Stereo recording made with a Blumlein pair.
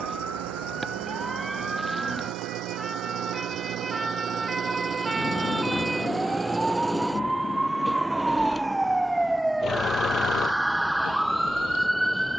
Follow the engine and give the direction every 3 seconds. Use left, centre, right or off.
right, right, centre, left.